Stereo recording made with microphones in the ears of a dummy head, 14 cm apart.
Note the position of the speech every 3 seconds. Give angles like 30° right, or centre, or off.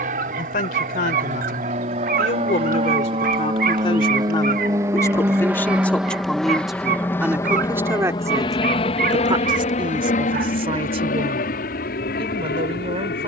60° left, 30° left, 10° right, 40° right, 40° right.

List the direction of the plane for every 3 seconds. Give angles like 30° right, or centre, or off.
50° right, 20° right, 20° left, 50° left, 60° left.